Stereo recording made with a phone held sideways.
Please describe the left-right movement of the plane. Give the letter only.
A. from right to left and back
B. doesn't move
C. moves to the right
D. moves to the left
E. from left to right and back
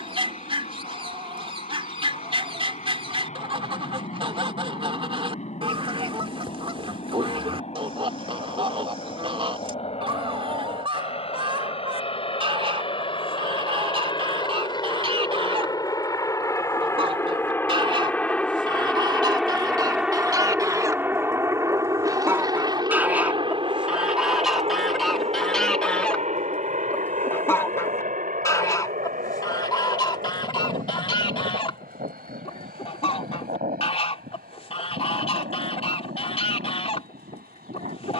C.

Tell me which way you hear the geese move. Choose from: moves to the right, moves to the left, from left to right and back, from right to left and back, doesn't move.
moves to the left.